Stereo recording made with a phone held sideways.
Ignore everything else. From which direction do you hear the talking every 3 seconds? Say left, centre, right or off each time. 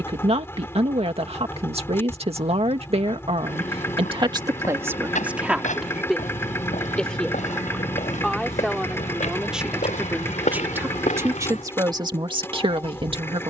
right, right, centre, centre, right.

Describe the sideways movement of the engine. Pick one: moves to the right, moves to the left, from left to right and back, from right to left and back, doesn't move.
doesn't move.